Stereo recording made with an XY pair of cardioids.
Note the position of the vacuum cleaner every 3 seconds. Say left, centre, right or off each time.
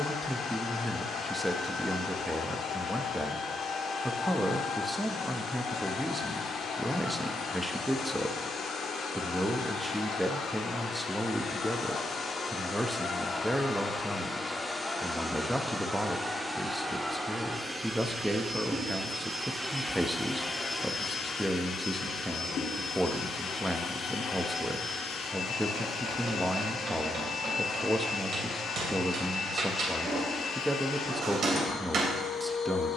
left, left, left, left, left, centre, centre, left, left, left, left.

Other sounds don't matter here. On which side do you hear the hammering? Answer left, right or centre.
right.